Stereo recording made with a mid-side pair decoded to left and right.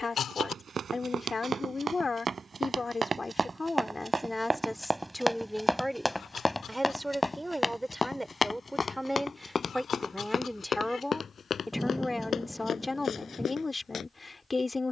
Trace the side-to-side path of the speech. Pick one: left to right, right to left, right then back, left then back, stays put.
right then back.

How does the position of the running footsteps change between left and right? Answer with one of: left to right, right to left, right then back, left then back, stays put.
right to left.